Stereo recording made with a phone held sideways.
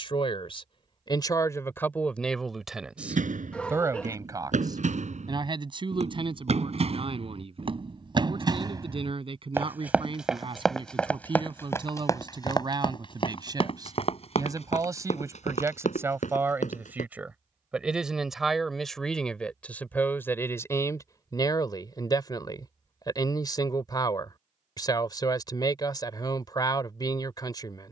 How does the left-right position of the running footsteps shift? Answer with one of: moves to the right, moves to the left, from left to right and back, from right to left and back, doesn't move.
moves to the left.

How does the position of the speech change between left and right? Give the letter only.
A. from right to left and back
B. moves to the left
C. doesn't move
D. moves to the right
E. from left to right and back
E.